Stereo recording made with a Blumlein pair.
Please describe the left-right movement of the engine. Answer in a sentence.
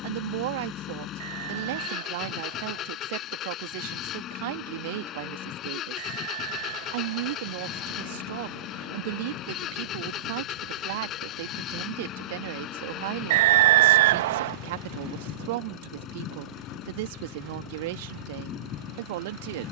In this clip you hear the engine stay put.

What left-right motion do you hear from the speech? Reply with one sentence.
In this clip you hear the speech stay in one place.